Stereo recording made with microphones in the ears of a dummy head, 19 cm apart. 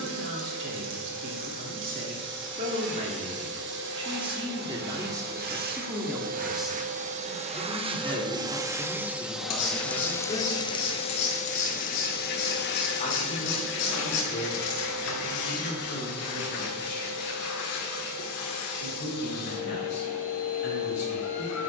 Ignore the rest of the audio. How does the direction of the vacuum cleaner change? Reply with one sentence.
You can hear the vacuum cleaner move from right to left.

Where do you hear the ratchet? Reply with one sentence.
You can hear the ratchet on the left.